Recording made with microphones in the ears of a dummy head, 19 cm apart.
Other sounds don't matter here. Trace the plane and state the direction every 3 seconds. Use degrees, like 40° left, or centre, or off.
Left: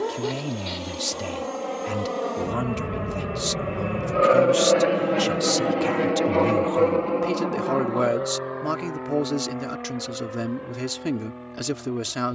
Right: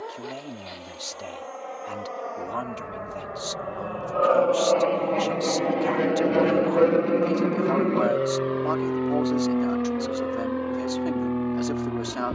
50° left, 20° left, 20° right, 50° right.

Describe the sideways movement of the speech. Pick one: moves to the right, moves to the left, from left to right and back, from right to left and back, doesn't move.
doesn't move.